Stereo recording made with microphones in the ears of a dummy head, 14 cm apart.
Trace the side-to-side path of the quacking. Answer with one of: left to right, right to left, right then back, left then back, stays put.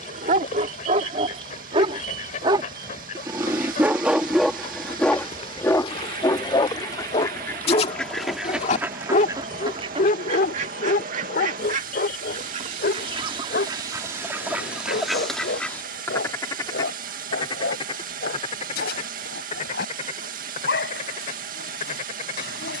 right then back.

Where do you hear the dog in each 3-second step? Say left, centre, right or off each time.
right, centre, left, left, left, left, left, left.